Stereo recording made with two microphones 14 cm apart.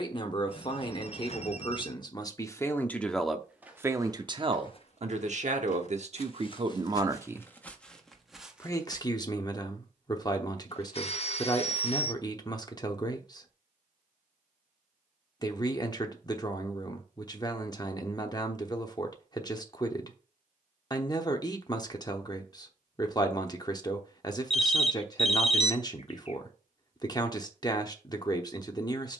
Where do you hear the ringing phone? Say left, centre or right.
left.